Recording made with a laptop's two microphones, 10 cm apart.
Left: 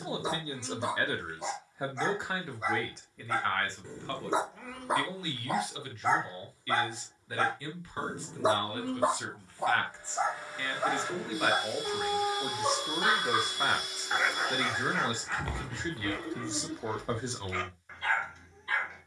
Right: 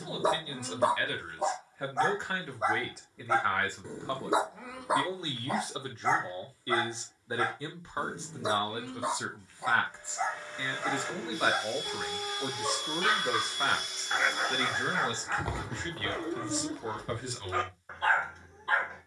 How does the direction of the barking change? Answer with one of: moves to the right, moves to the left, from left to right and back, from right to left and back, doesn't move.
from right to left and back.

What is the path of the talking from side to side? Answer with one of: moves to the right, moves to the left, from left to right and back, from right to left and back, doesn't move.
from left to right and back.